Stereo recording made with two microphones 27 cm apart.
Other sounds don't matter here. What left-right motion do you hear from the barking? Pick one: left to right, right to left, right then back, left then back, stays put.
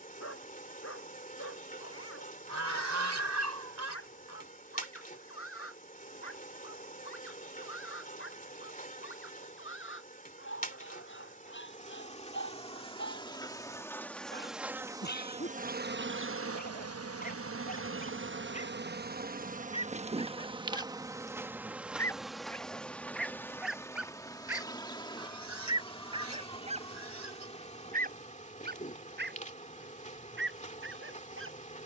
left to right.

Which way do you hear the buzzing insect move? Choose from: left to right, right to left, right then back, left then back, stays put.
right then back.